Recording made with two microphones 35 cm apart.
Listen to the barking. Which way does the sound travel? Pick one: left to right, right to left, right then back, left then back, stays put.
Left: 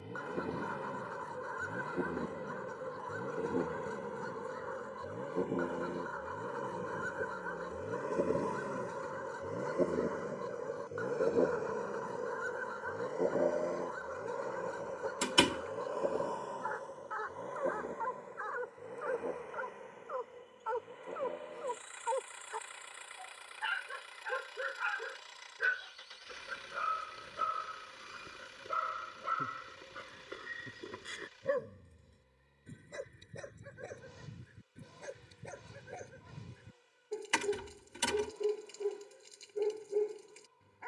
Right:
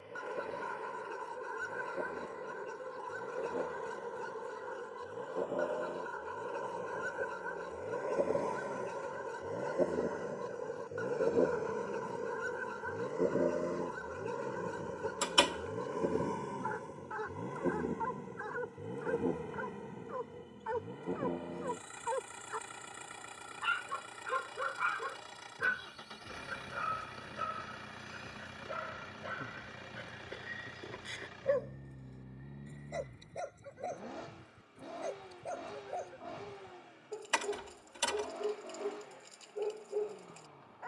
right to left.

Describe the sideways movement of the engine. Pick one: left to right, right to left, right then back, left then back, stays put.
left to right.